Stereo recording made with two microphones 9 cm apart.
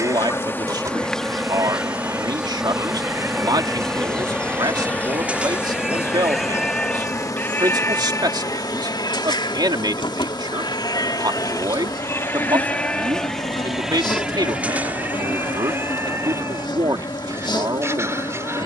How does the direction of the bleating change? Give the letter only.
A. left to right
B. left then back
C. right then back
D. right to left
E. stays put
B.